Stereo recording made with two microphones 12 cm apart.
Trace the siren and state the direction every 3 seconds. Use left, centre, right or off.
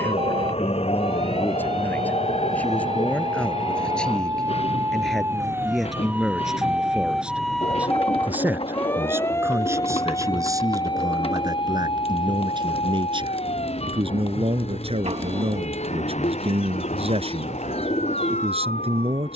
right, right, centre, left, left, left, left.